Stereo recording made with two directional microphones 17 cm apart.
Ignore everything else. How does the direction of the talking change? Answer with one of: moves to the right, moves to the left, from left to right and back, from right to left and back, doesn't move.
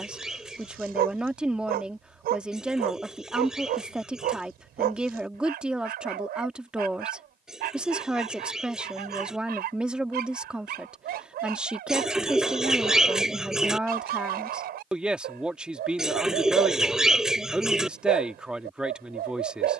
doesn't move.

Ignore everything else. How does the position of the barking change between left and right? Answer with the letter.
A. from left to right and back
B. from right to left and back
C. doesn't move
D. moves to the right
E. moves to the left
C.